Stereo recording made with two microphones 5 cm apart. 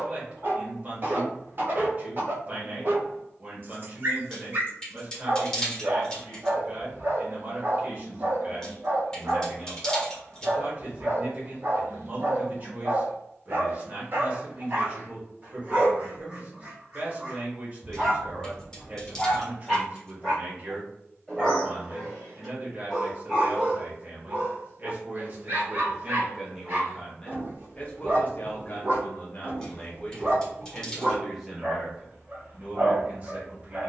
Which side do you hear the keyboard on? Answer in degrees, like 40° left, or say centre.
10° left.